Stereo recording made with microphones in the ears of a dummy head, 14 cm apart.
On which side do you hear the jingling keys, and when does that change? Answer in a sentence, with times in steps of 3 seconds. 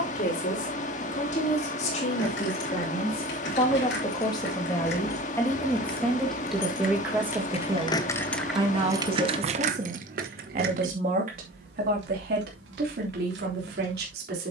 You can hear the jingling keys on the left from 0 s and on the right from 9 s.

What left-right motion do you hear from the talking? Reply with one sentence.
You can hear the talking move from left to right.